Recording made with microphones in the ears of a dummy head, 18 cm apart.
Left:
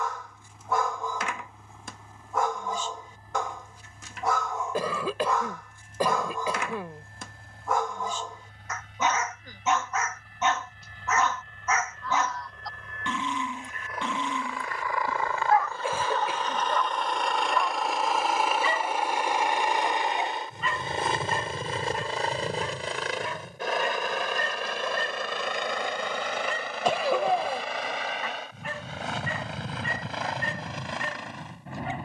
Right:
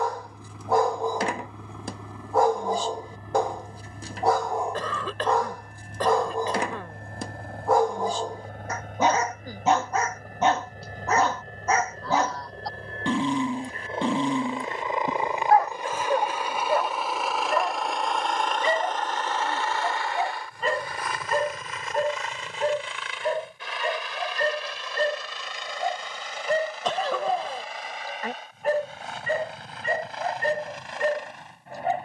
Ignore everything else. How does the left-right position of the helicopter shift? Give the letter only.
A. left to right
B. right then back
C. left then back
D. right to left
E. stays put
D.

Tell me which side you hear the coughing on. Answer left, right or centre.
centre.